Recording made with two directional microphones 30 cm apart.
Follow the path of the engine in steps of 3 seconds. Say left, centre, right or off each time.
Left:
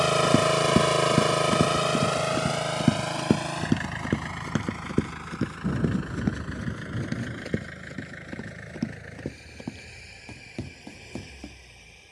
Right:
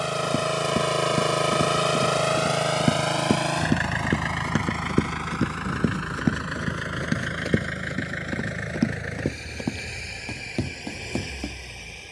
centre, right, right, right.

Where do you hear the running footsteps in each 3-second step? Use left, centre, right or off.
left, centre, right, right.